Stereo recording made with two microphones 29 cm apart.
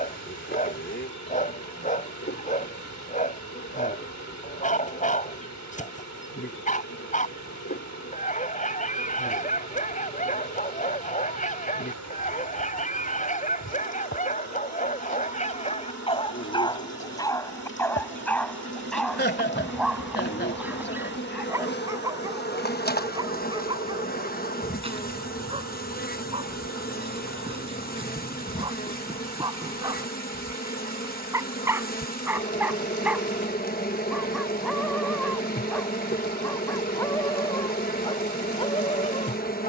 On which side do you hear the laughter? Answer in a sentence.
In this clip you hear the laughter on the left.